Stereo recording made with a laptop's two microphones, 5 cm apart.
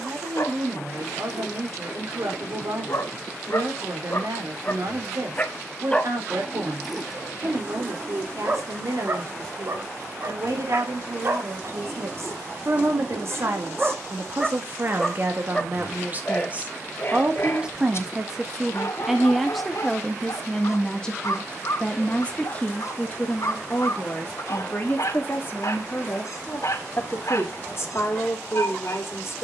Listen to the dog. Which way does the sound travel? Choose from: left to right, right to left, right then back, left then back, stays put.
right then back.